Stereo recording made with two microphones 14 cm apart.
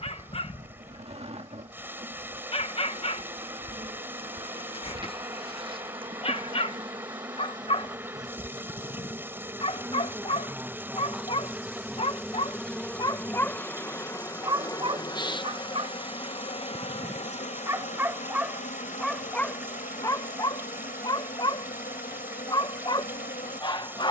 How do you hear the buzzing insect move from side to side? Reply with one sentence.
You can hear the buzzing insect travel towards the left.